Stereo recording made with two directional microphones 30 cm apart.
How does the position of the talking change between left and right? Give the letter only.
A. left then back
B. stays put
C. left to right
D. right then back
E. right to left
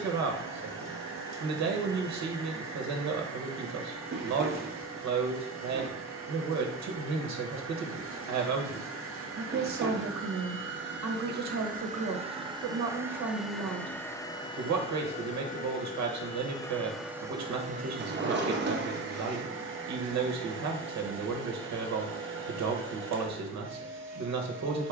B.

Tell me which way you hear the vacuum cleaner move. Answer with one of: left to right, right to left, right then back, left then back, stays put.
left then back.